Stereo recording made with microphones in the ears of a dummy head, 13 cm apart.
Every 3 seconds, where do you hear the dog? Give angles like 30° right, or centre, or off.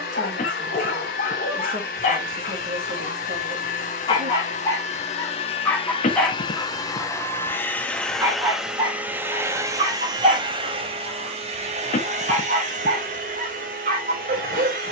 50° left, 30° left, 10° right, 40° right, 50° right.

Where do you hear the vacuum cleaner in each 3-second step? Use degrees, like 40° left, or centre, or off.
60° left, 50° left, 10° left, 30° right, 60° right.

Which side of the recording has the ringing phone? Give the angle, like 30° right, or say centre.
50° left.